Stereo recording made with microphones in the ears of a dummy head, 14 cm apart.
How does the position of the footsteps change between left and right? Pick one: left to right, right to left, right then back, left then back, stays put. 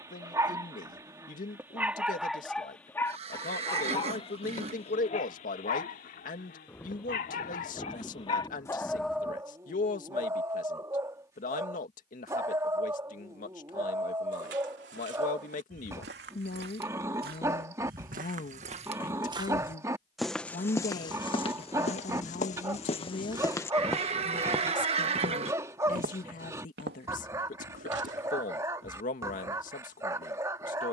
left then back.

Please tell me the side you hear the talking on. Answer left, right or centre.
left.